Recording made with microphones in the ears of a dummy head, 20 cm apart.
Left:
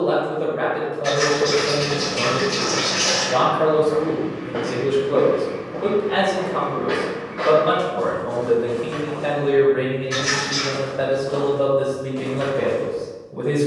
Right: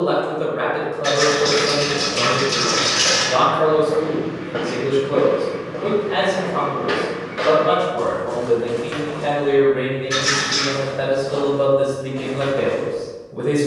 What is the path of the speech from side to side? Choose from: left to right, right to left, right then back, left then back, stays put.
left then back.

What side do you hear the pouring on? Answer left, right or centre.
right.